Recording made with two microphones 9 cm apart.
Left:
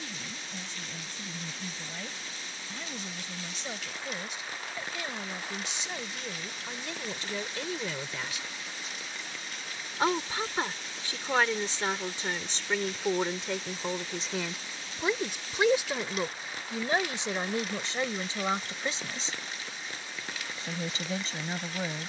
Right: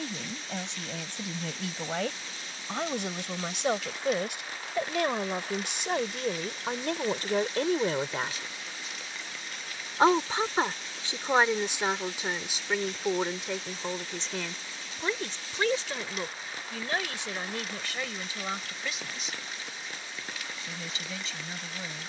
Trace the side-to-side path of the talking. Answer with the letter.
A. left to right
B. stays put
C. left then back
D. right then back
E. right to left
E.